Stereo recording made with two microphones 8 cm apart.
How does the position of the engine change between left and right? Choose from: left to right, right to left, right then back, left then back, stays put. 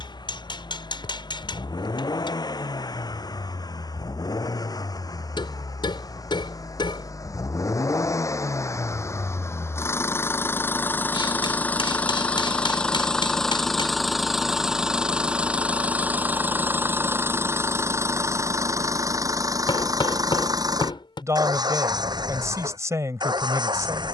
left to right.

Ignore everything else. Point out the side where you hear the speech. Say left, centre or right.
right.